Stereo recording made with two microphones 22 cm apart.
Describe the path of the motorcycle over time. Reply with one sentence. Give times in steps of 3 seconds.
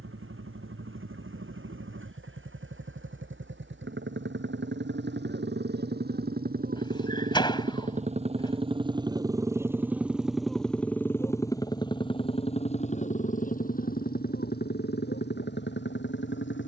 In this clip you hear the motorcycle on the right from 0 s, in the centre from 9 s and on the left from 12 s.